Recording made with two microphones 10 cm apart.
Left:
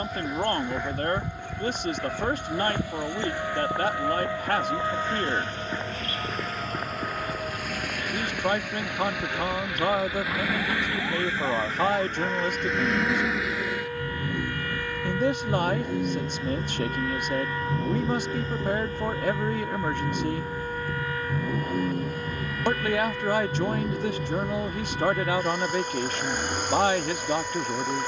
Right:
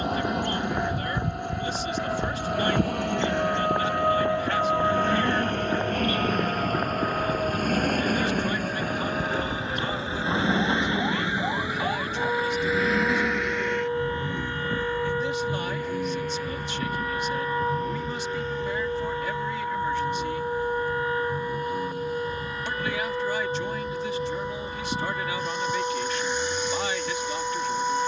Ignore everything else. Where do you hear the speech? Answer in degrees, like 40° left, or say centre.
60° left.